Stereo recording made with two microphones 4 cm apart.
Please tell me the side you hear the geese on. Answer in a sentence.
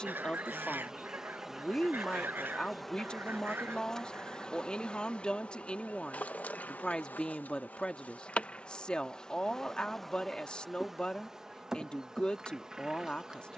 You can hear the geese on the right.